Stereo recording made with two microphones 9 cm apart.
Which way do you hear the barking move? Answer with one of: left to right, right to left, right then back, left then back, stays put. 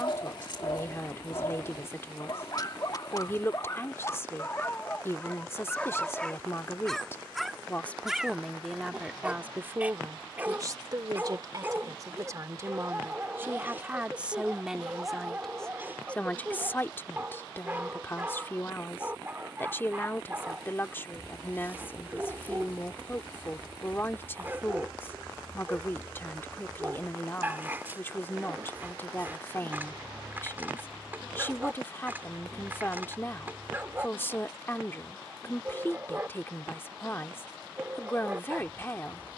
left to right.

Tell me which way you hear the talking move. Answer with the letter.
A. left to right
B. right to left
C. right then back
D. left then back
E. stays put
C.